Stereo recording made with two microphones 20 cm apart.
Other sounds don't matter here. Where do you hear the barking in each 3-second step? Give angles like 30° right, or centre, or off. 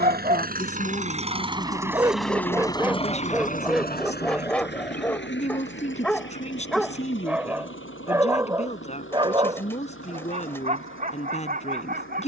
20° right, centre, 10° right, 40° right.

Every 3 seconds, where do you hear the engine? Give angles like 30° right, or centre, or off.
20° right, 50° left, 80° left, 80° left.